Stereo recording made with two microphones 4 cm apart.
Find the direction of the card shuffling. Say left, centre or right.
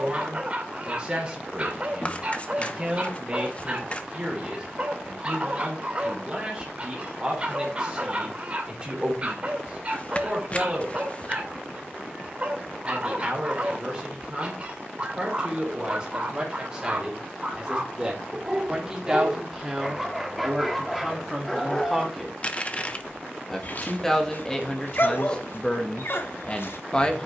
left.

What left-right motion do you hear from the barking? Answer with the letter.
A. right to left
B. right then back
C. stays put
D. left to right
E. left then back
A.